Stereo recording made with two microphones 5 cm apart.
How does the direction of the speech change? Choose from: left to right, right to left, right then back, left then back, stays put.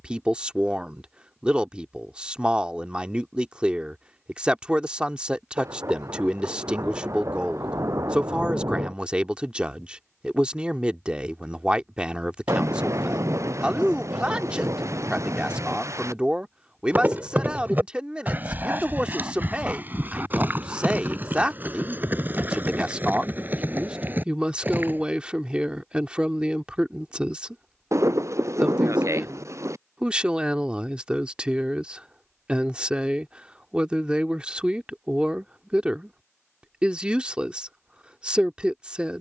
stays put.